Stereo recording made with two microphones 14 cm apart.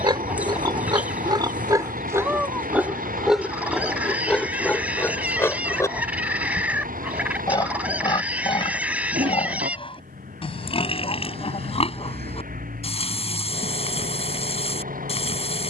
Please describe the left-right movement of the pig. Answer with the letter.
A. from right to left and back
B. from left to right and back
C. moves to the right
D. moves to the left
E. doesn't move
D.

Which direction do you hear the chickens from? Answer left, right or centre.
centre.